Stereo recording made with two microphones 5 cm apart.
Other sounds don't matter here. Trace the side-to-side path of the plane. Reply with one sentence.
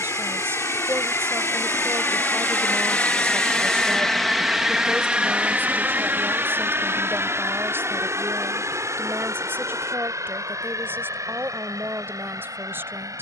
In this clip you hear the plane move to the right.